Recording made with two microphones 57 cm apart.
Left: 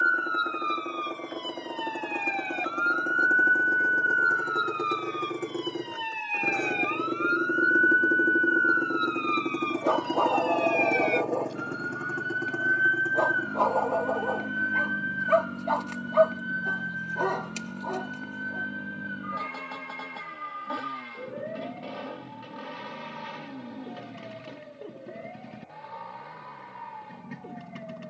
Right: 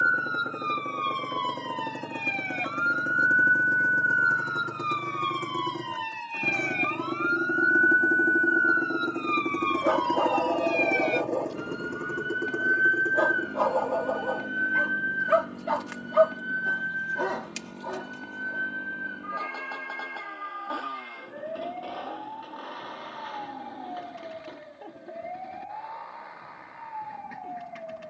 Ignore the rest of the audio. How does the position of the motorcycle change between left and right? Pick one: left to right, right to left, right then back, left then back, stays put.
right to left.